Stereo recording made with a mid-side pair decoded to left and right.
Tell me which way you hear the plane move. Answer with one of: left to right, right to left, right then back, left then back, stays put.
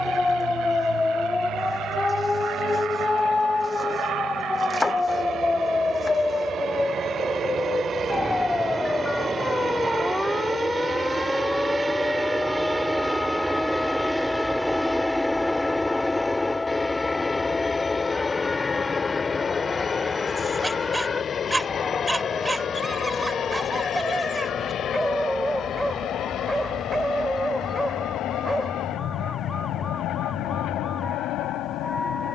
right to left.